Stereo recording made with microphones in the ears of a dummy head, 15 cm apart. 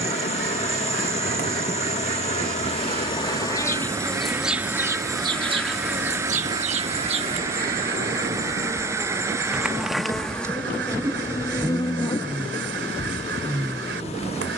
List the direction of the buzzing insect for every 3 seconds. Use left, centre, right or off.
left, centre, right, centre, left.